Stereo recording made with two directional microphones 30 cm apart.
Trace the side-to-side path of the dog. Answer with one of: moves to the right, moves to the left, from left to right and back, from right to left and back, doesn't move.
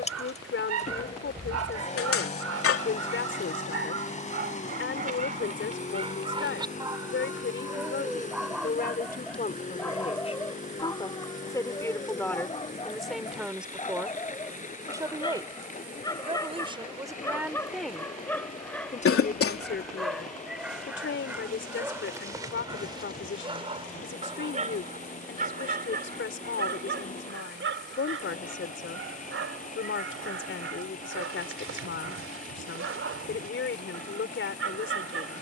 from right to left and back.